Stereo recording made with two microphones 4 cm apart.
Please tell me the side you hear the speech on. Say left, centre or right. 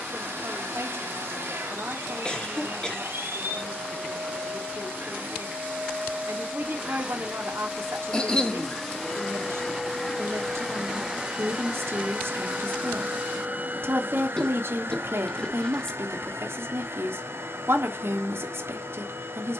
right.